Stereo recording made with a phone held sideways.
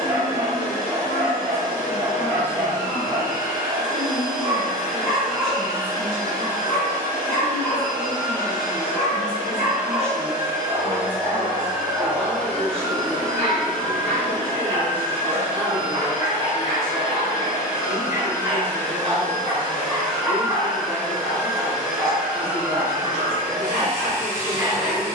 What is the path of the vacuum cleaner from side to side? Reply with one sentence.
You can hear the vacuum cleaner move from right to left and back again.